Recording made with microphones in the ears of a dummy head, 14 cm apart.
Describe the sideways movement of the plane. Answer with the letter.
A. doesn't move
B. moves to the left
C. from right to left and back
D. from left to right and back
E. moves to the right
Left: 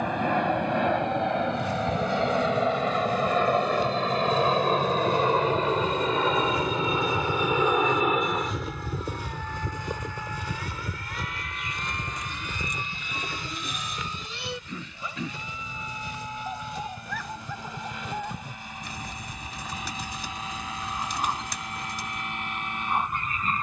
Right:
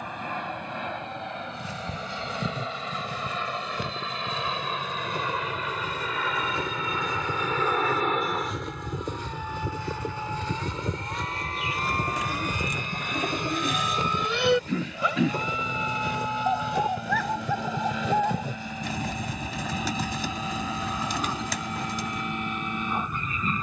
E.